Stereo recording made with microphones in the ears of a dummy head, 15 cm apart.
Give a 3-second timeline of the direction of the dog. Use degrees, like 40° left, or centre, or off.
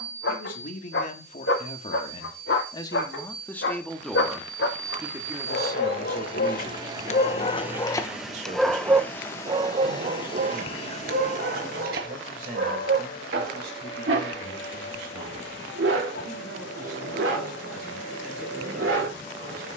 80° left, 70° left, 30° left, 50° right, 70° right, 70° right, 70° right.